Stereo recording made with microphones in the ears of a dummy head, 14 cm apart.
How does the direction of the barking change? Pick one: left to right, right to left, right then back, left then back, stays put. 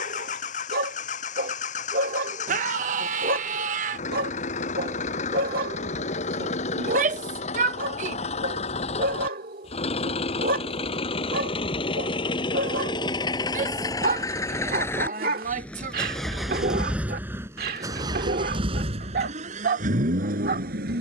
stays put.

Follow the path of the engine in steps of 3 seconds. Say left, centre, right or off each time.
left, left, left, left, left, centre, right.